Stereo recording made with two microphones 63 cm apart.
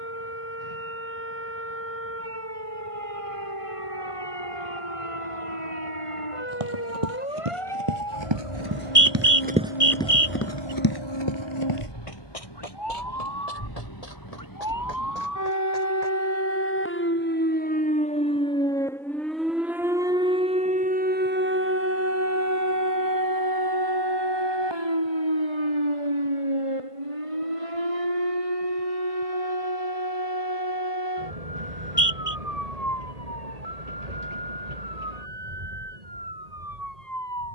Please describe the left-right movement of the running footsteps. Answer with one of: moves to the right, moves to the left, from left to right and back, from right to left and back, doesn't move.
moves to the left.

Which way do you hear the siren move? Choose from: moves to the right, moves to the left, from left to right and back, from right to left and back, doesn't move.
moves to the right.